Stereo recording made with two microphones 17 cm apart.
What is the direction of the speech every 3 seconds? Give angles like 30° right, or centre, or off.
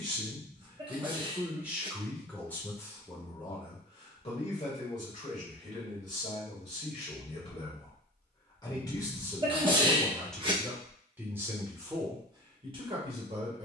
10° right, 40° left, 40° left, centre, 30° right.